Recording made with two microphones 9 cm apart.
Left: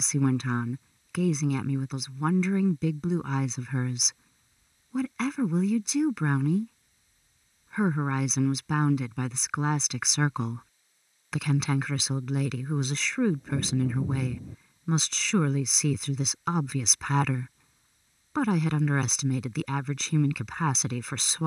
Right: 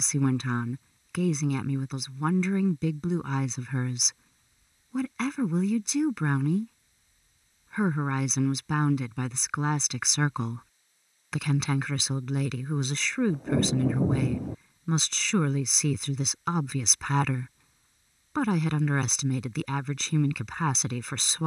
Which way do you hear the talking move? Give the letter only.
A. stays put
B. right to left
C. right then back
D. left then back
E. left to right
A.